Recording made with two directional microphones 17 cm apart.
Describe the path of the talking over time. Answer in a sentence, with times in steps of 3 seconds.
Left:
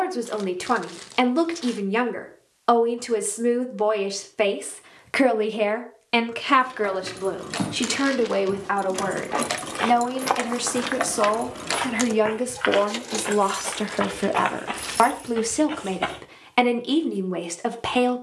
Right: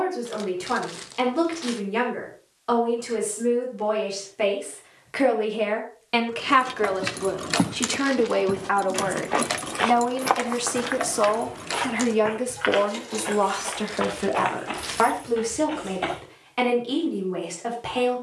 You can hear the talking on the left from 0 s, in the centre from 6 s and on the left from 12 s.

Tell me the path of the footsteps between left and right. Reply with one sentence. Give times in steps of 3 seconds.
You can hear the footsteps not at all from 0 s, on the right from 6 s, in the centre from 9 s and on the left from 12 s.